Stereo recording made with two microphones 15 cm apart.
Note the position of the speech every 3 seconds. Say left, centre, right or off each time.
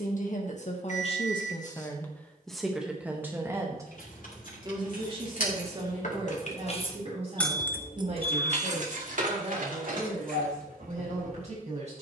left, right, right, right.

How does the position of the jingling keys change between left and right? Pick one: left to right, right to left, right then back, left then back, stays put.
left to right.